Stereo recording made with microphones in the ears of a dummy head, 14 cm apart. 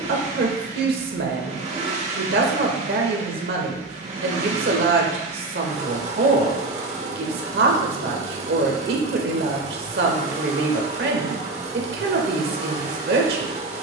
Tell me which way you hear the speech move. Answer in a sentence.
You can hear the speech stay in one place.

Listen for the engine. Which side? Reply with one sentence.
In this clip you hear the engine on the right.